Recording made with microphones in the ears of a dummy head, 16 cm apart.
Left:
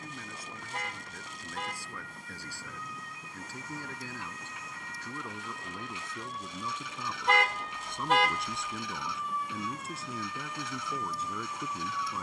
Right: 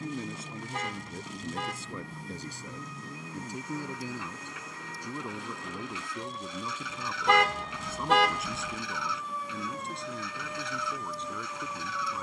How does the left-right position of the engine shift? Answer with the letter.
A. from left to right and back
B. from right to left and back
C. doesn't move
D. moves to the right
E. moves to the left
C.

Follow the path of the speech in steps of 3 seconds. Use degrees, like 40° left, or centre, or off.
20° right, 10° right, 10° right, centre.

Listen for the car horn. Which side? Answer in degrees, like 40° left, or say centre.
70° right.